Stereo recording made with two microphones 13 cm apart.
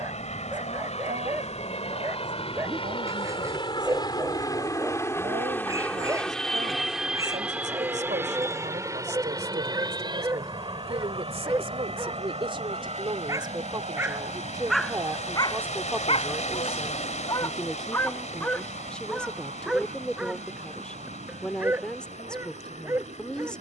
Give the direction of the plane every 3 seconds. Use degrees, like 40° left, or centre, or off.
50° left, 30° left, 10° right, 30° right, 50° right, 60° right, 60° right, 60° right.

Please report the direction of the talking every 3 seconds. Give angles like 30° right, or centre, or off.
80° right, 80° right, 70° right, 60° right, 40° right, 10° right, 10° left, 10° left.